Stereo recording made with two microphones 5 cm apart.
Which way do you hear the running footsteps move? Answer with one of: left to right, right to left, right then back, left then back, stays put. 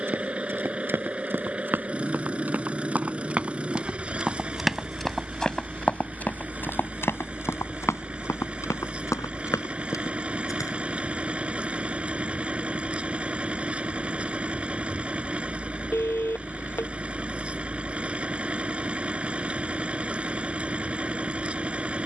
right to left.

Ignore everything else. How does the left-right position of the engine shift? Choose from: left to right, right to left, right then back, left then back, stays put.
stays put.